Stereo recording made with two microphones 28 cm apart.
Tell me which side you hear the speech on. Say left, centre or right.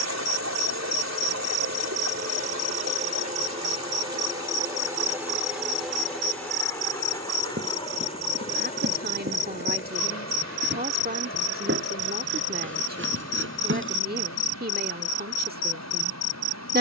right.